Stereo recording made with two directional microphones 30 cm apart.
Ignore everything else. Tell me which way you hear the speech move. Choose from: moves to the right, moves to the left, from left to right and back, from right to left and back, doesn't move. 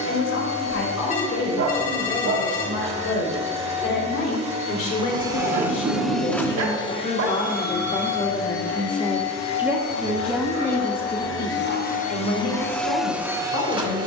from left to right and back.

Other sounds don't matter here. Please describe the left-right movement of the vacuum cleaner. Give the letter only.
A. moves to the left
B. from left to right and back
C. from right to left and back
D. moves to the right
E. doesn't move
C.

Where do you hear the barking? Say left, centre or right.
right.